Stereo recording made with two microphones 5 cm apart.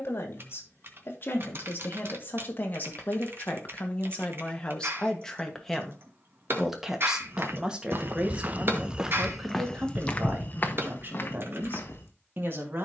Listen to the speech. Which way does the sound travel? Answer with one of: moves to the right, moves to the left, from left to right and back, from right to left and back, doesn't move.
moves to the right.